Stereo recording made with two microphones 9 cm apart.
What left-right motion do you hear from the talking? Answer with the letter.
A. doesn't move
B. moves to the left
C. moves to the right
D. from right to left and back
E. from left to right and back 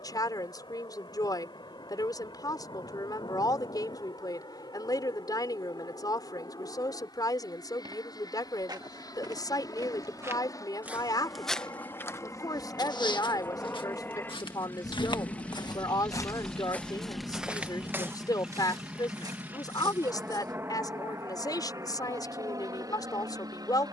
A.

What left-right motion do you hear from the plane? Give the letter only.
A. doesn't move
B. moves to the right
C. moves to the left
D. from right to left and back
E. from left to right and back
B.